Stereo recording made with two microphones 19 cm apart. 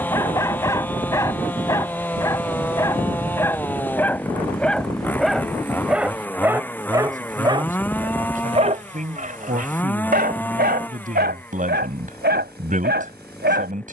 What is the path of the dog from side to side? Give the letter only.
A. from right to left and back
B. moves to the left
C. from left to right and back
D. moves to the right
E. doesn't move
D.